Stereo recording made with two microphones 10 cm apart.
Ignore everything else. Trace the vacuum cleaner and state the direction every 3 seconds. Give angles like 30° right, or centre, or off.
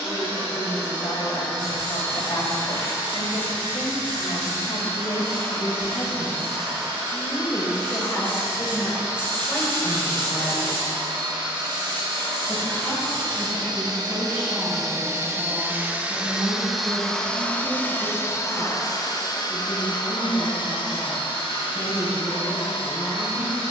70° right, 70° right, 70° right, 60° right, 40° right, centre, 40° left, 70° left.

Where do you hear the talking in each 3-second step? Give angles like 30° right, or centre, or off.
60° left, 60° left, 30° left, 10° left, 10° right, 20° right, 30° right, 30° right.